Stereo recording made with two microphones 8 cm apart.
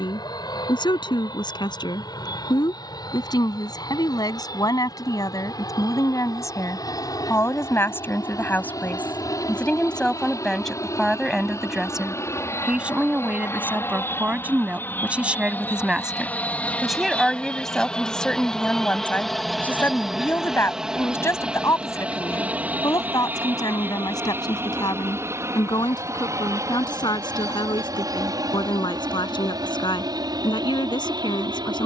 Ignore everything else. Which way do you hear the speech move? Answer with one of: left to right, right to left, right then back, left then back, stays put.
right then back.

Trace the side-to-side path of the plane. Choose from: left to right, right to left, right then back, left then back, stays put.
left to right.